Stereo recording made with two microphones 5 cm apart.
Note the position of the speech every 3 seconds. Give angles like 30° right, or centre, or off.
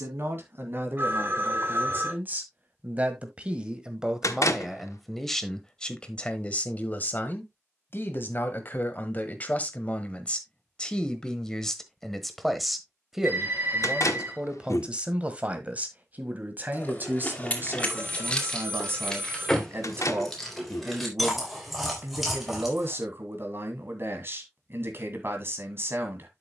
40° right, 10° right, 40° left, 20° left, 10° right, 30° right, 40° right, 40° right, 40° right.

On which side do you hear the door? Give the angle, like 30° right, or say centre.
80° left.